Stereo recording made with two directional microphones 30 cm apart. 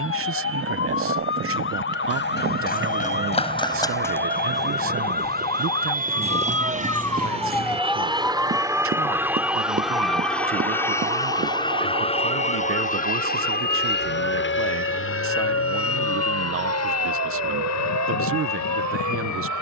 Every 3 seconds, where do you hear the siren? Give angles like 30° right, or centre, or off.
40° left, 30° left, centre, 20° right, 40° right, 50° right, 60° right.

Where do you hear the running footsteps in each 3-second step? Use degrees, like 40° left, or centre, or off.
40° left, 10° left, 30° right, 50° right, off, off, off.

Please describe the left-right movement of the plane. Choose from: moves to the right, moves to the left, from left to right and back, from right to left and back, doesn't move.
moves to the left.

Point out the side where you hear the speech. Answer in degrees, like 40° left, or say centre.
50° right.